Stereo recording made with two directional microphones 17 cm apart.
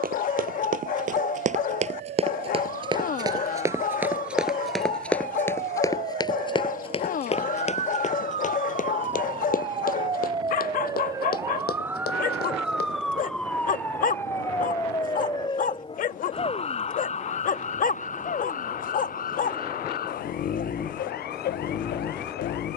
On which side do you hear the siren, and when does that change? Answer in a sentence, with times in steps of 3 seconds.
In this clip you hear the siren on the right from 0 s, in the centre from 12 s and on the left from 15 s.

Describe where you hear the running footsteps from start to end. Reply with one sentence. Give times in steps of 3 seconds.
You can hear the running footsteps on the right from 0 s, in the centre from 3 s, on the left from 6 s and not at all from 15 s.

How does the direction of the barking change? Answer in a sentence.
You can hear the barking stay put.